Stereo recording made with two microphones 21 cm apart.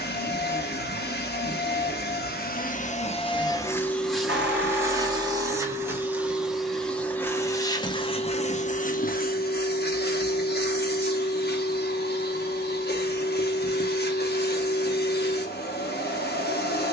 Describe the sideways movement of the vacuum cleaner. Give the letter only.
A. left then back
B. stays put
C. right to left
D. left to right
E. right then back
E.